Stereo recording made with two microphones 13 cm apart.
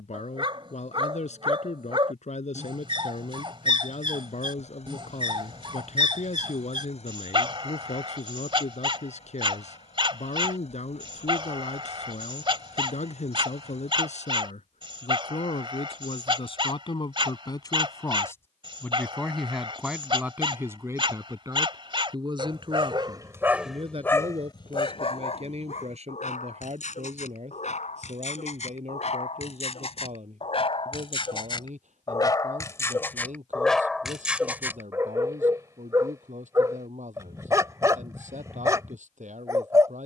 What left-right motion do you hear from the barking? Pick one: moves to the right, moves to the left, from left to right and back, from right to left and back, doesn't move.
from right to left and back.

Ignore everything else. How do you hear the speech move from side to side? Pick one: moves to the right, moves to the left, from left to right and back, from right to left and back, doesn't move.
moves to the right.